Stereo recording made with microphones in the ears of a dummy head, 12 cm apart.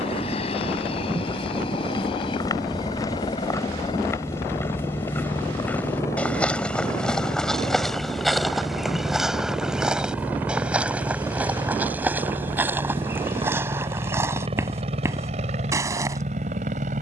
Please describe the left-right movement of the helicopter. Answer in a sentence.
In this clip you hear the helicopter go from the left side to the right.